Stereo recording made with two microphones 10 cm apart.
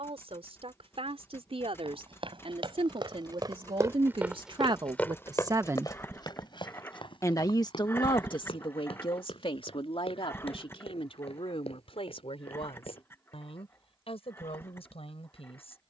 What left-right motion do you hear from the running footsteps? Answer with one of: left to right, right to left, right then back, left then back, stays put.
right to left.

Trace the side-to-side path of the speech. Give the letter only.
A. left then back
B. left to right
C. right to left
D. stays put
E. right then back
C.